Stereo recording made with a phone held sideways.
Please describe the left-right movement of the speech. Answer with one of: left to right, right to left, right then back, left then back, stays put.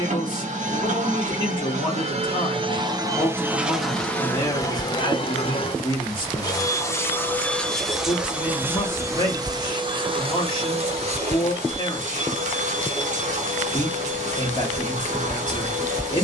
stays put.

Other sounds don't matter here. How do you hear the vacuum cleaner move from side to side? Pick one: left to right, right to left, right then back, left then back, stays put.
left then back.